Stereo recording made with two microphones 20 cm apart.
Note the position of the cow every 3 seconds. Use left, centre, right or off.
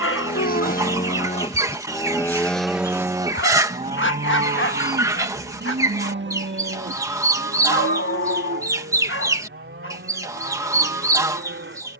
left, right, right, right.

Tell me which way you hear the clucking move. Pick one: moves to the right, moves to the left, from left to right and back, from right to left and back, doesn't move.
doesn't move.